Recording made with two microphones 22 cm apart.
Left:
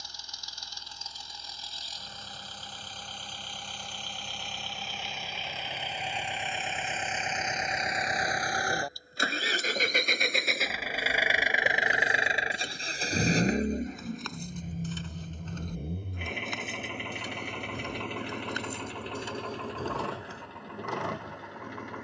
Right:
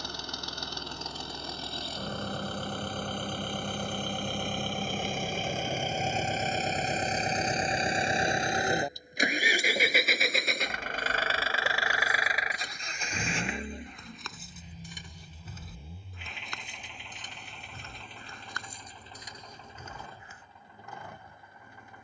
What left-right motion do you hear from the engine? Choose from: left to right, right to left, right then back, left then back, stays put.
right to left.